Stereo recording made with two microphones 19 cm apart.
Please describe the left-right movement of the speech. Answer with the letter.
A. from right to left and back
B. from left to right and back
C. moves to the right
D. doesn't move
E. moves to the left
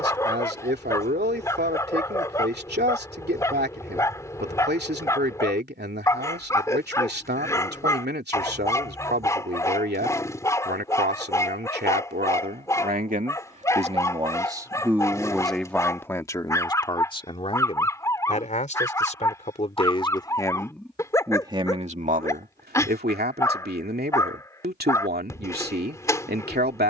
A.